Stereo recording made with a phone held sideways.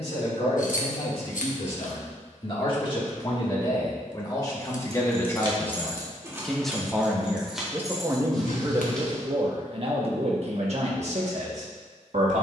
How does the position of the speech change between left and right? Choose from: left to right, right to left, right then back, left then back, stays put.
left to right.